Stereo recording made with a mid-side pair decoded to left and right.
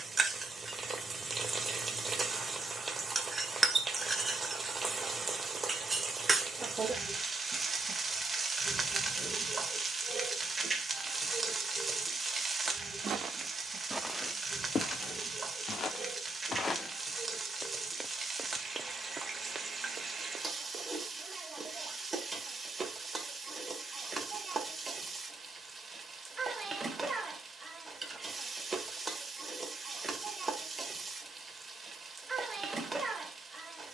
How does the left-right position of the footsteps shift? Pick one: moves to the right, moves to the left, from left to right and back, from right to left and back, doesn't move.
from right to left and back.